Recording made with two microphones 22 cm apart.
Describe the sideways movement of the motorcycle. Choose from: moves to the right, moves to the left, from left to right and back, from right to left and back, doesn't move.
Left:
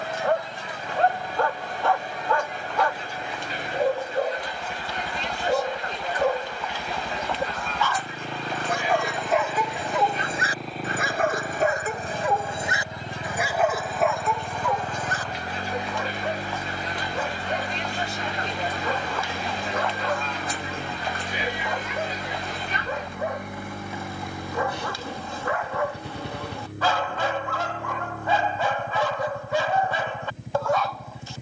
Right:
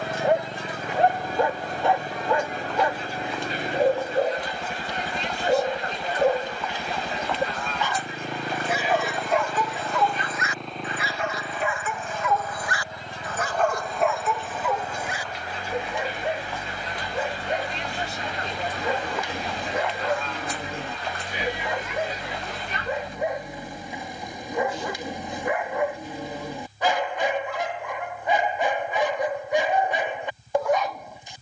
moves to the left.